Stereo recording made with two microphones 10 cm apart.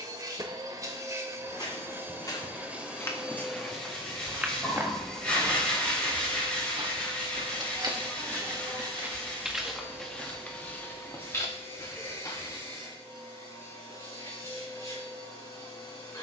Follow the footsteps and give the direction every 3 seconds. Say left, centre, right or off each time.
left, centre, right, centre, left, off.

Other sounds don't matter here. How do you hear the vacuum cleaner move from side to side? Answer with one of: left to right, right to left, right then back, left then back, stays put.
right to left.